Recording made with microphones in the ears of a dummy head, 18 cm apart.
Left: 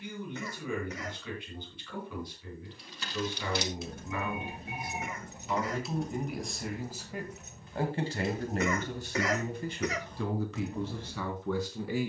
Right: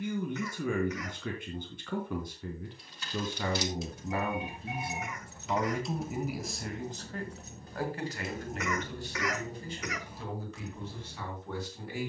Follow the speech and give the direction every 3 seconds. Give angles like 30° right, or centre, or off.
40° right, 30° right, 20° left, 50° left.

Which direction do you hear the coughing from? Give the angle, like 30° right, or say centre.
30° left.